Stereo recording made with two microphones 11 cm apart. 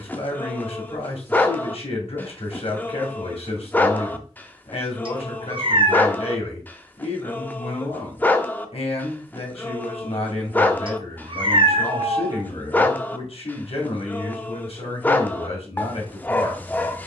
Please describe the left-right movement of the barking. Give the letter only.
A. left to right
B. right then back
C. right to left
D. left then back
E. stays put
E.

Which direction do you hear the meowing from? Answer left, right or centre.
right.